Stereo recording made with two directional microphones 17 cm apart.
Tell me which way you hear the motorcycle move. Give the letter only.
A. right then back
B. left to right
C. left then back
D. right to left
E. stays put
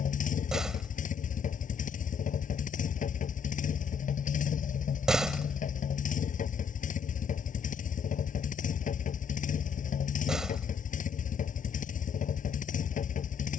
E.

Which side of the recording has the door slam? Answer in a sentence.
In this clip you hear the door slam in the centre.